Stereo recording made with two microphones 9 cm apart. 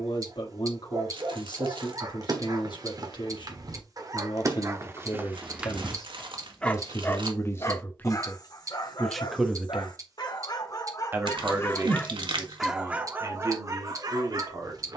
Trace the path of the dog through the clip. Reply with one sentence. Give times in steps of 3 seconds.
In this clip you hear the dog on the right from 0 s, on the left from 6 s and on the right from 12 s.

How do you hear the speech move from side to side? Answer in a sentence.
In this clip you hear the speech move to the right.